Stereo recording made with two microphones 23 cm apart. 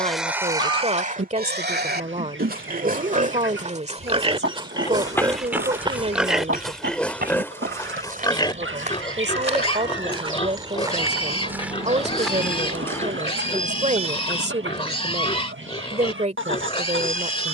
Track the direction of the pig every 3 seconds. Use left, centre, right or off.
right, right, centre, left, left, left.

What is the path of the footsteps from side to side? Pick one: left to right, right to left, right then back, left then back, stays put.
right then back.